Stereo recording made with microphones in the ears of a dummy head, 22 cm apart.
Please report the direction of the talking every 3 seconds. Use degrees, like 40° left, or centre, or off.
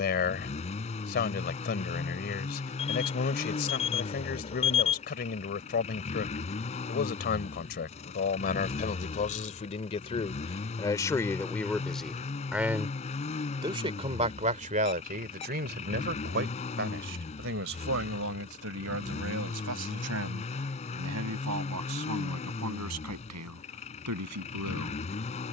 40° left, 40° left, 40° left, 20° left, 20° right, 50° right, 60° right, 70° right, 70° right.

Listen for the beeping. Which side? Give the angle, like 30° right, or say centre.
30° left.